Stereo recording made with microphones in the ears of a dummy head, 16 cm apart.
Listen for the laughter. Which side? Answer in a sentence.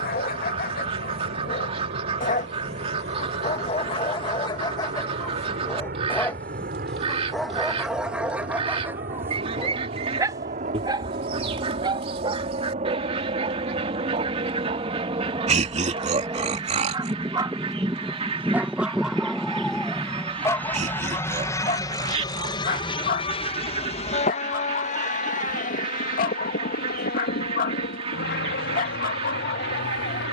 You can hear the laughter on the right.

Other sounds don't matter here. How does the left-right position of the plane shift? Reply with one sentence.
In this clip you hear the plane travel towards the left.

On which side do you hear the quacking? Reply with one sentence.
You can hear the quacking on the right.